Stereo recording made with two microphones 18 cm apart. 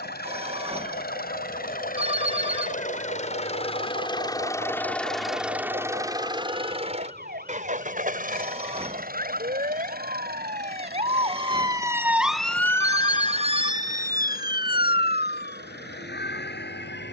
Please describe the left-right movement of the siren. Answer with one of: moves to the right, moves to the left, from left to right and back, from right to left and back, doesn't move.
moves to the left.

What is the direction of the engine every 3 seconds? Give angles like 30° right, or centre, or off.
60° left, 20° left, 40° right, 70° right, 70° right, 80° right.